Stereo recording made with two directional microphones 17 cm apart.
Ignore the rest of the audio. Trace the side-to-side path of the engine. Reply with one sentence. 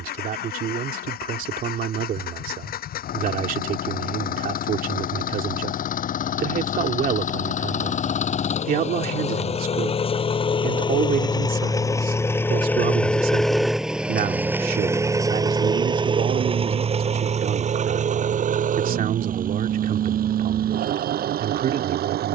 In this clip you hear the engine travel towards the right.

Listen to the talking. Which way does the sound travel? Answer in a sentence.
You can hear the talking stay in one place.